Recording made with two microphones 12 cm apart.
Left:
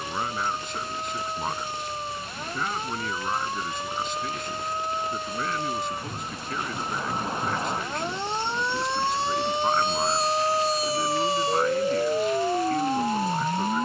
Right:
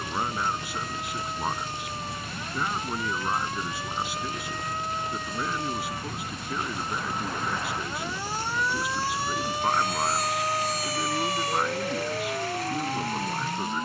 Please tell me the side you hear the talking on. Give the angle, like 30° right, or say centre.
10° right.